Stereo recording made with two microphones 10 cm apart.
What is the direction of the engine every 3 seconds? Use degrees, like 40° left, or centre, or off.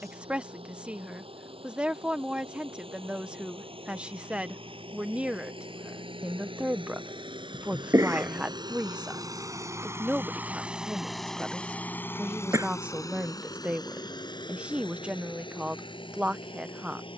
80° right, 70° right, 60° right, 10° right, 40° left, 60° left.